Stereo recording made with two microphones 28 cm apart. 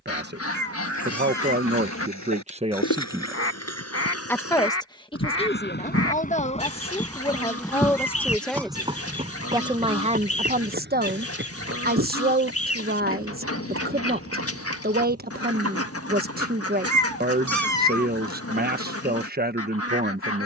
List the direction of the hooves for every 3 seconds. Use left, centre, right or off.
left, left, centre, right, right, right, off.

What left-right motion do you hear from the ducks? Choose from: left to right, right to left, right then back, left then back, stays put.
stays put.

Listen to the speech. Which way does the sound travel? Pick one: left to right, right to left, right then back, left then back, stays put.
left then back.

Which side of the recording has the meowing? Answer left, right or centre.
right.